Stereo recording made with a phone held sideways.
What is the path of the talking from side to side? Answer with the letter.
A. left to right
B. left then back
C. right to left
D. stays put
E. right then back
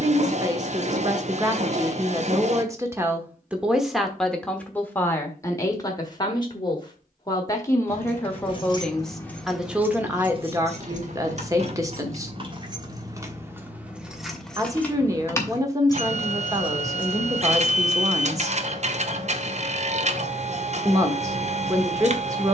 B.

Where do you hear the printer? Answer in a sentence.
You can hear the printer on the right.